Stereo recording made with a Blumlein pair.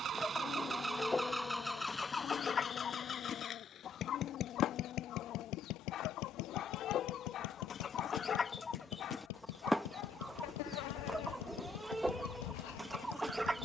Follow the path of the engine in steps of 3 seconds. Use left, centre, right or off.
centre, left, left, left, left.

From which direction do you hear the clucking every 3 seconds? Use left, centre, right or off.
centre, left, left, centre, centre.